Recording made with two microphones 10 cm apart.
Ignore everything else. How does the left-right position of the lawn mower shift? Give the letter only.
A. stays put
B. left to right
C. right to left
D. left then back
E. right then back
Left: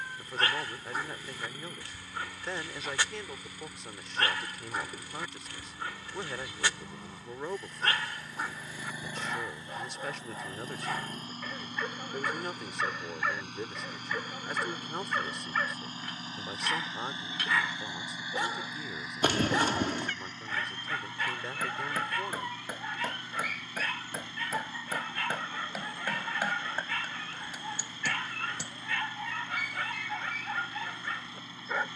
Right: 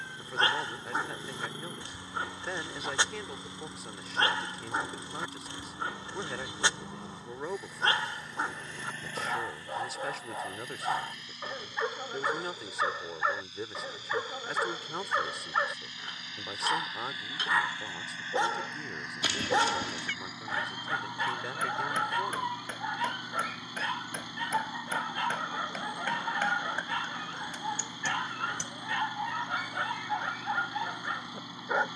D.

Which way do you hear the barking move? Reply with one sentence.
You can hear the barking stay put.